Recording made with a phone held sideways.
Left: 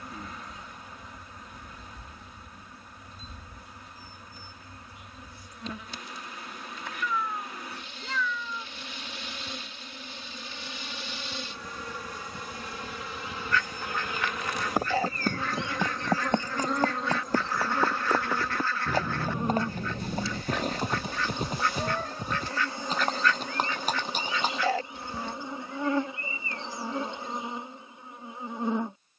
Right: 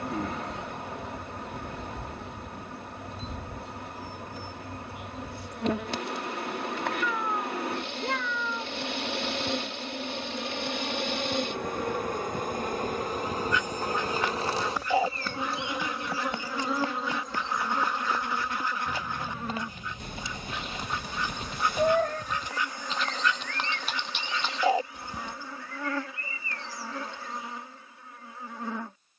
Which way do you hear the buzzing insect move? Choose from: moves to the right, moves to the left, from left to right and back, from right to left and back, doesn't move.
moves to the left.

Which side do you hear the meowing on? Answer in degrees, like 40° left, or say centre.
60° right.